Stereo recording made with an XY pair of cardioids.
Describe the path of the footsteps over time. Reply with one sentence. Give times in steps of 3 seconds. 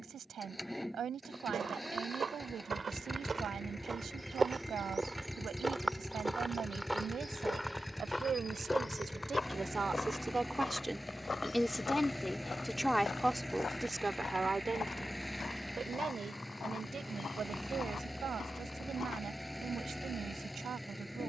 In this clip you hear the footsteps on the right from 0 s, in the centre from 6 s and on the left from 9 s.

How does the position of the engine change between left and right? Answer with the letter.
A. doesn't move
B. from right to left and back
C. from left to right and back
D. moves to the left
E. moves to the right
A.